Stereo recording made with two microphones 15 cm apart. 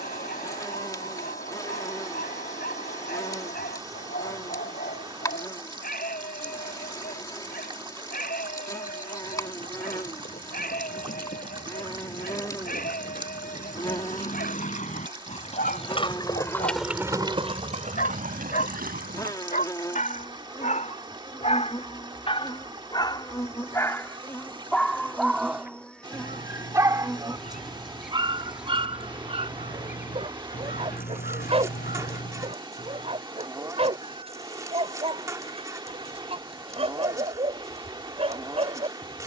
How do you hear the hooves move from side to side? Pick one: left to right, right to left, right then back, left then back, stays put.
left to right.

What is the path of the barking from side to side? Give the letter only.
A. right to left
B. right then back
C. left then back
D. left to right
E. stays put
D.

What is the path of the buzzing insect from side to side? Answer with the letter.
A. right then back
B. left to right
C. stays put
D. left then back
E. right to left
B.